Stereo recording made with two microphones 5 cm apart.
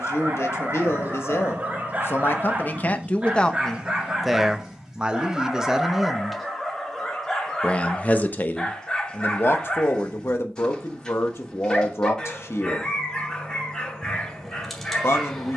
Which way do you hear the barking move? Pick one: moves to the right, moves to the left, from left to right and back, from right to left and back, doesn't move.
moves to the left.